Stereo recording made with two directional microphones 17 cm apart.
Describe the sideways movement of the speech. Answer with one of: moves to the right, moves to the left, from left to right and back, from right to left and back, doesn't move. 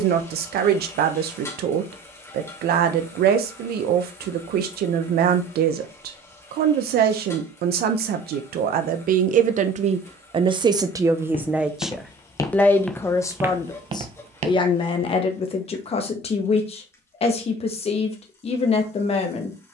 moves to the left.